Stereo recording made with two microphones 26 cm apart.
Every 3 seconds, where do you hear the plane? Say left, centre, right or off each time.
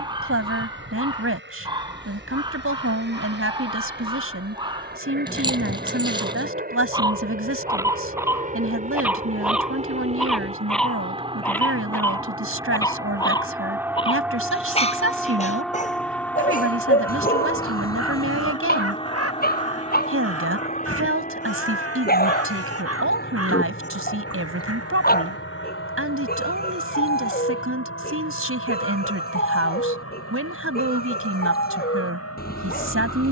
right, right, right, right, centre, centre, left, left, left, left, left.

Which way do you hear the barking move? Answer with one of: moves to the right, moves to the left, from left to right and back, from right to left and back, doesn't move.
moves to the left.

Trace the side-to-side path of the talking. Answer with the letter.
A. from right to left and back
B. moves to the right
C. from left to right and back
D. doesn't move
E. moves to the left
D.